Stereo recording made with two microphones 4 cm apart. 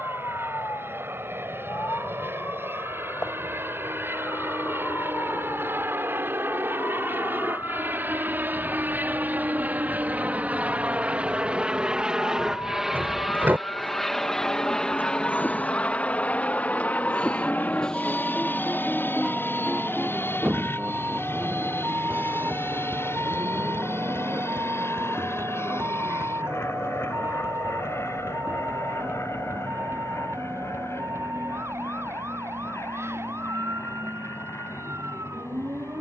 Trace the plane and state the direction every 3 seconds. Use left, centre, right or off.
right, right, right, right, centre, left, left, left, left, left, left, left.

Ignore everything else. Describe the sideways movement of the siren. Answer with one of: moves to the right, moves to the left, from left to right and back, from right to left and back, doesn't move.
moves to the right.